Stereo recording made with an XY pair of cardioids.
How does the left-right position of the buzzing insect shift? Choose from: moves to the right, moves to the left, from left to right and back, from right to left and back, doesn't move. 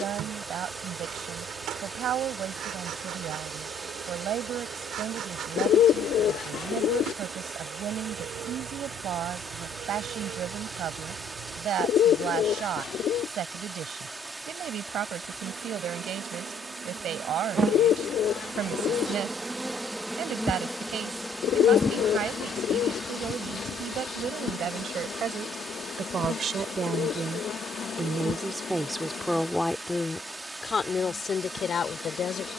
moves to the left.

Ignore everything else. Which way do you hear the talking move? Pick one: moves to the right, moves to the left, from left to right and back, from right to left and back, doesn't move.
moves to the left.